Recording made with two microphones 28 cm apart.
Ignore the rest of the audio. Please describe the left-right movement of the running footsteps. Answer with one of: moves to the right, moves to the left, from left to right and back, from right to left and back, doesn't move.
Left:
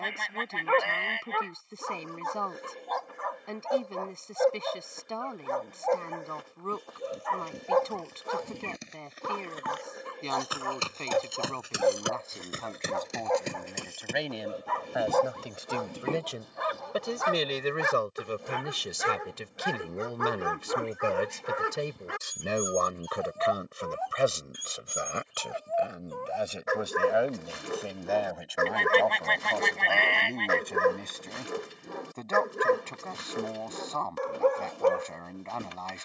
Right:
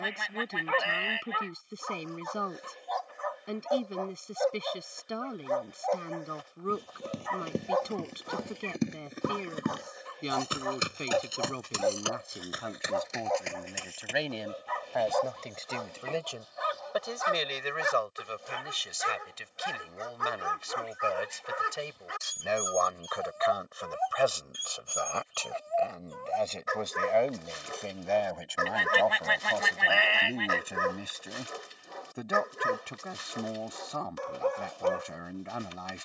moves to the left.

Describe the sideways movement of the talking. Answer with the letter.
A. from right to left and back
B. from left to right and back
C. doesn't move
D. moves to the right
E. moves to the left
A.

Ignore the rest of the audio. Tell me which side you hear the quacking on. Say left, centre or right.
centre.